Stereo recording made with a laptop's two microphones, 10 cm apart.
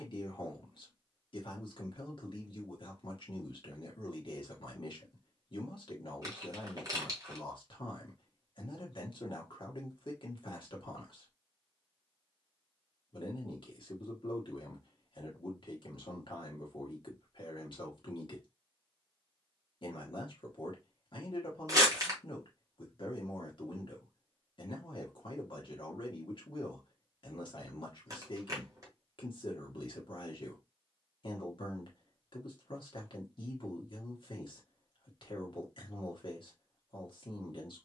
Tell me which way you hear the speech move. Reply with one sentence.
You can hear the speech stay in one place.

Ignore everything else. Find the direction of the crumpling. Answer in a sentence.
You can hear the crumpling on the right.